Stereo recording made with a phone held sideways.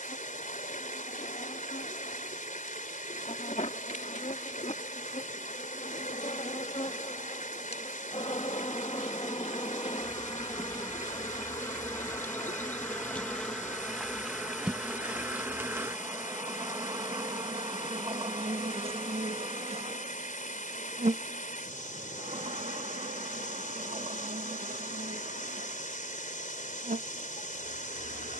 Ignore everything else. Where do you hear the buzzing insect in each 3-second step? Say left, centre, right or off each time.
left, left, left, left, centre, right, right, right, right, right.